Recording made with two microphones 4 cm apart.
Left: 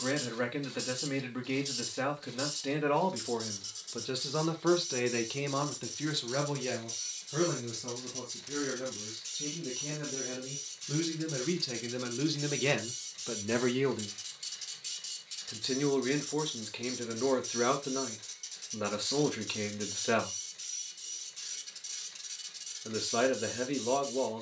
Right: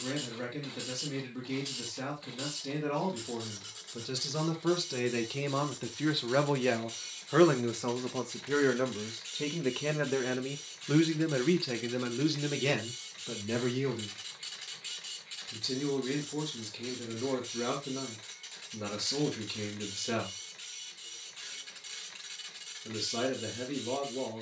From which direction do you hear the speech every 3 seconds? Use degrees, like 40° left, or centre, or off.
40° left, 20° left, 50° right, 50° right, 10° left, 40° left, 40° left, 40° left.